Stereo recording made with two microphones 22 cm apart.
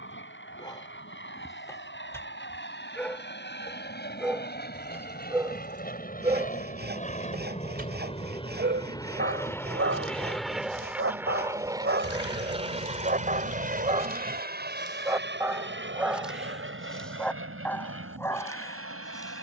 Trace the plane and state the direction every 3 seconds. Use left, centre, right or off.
left, left, left, centre, right, right, right.